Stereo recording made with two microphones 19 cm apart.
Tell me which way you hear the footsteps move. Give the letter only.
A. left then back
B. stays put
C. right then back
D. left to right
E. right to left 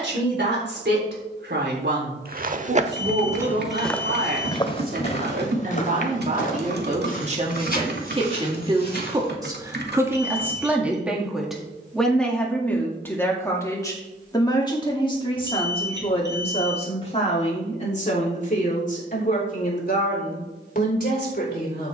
E.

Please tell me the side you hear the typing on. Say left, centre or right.
right.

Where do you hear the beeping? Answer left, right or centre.
right.